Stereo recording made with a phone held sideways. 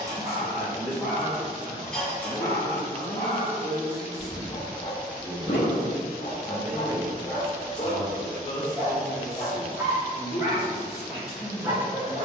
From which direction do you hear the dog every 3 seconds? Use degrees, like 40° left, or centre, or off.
centre, 40° left, 40° left, 10° right.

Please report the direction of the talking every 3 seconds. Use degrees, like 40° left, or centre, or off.
40° left, centre, 10° left, 40° left.